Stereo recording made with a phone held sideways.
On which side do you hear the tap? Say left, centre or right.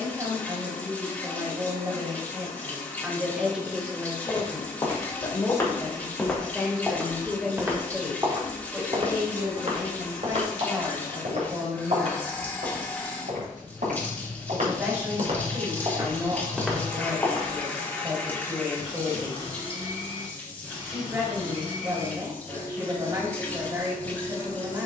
centre.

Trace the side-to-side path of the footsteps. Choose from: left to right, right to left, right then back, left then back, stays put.
right then back.